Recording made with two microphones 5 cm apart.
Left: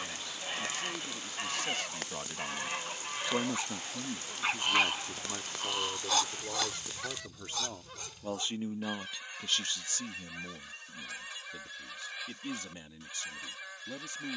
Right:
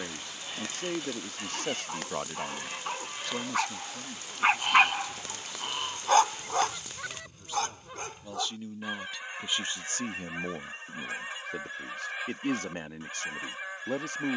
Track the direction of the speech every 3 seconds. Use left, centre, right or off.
right, left, left, right, right.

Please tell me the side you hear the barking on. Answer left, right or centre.
right.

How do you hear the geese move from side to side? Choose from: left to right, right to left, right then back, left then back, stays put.
left to right.